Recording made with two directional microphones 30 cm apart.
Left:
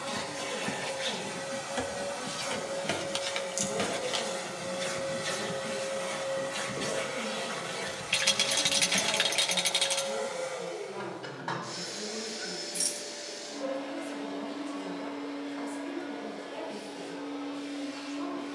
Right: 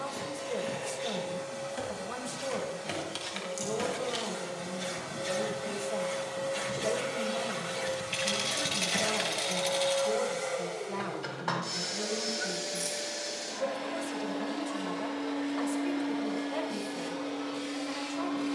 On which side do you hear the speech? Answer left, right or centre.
right.